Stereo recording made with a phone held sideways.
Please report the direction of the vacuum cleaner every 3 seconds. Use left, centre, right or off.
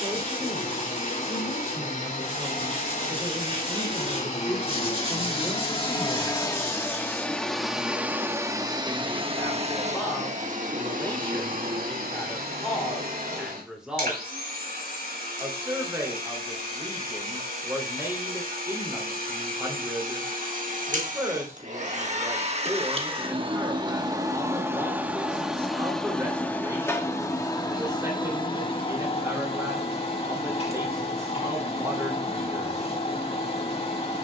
left, left, centre, right, right, right, right, right, centre, left, left, left.